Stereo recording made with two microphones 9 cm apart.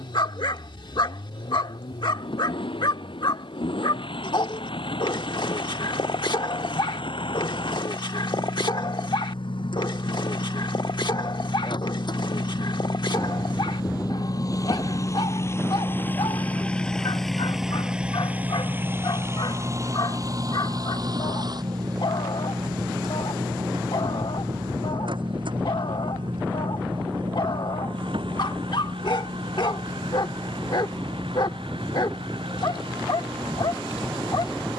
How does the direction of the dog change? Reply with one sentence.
In this clip you hear the dog stay put.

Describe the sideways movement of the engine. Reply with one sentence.
In this clip you hear the engine go from the left side to the right.